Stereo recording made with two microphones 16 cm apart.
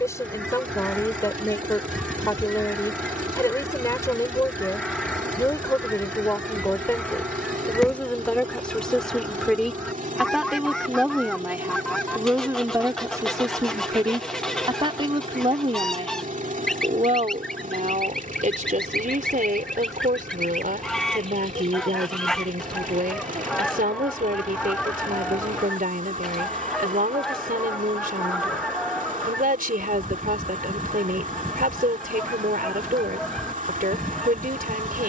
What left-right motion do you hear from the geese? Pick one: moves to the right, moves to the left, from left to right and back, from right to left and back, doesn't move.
doesn't move.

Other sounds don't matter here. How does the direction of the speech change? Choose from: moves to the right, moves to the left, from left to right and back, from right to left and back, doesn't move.
moves to the right.